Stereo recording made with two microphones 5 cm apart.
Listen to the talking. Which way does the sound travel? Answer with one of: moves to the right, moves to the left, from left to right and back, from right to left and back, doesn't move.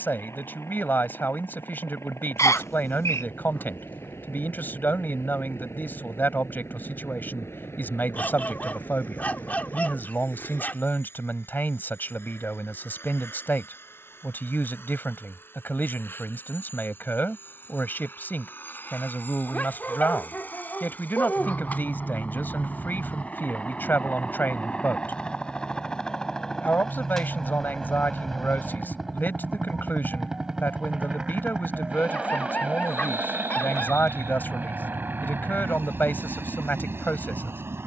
doesn't move.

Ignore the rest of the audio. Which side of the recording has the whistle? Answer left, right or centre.
left.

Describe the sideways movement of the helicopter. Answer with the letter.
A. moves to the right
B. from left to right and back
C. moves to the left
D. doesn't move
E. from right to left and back
A.